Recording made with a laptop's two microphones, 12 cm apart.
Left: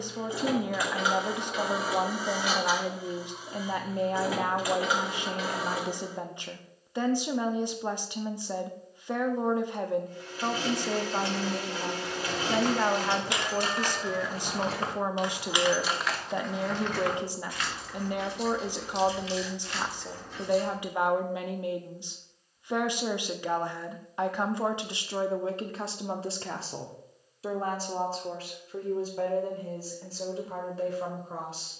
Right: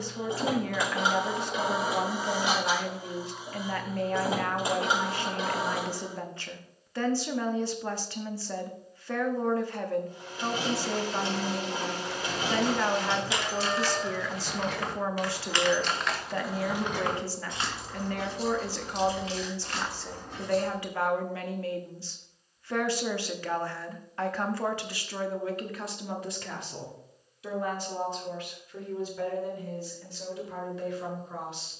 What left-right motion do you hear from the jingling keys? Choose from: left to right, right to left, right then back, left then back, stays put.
left to right.